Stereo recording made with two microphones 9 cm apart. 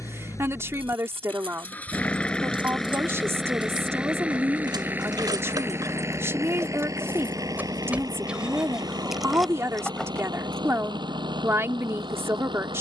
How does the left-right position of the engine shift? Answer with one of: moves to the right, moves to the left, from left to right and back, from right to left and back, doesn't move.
moves to the right.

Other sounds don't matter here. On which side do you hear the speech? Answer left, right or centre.
right.